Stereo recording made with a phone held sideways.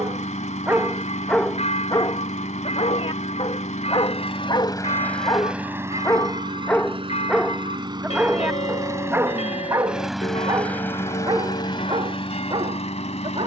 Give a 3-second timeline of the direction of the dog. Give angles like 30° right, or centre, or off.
10° left, 40° left, centre, 30° right, 40° right.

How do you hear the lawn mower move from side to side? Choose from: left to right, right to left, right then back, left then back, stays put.
right then back.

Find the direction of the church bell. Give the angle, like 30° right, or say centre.
50° left.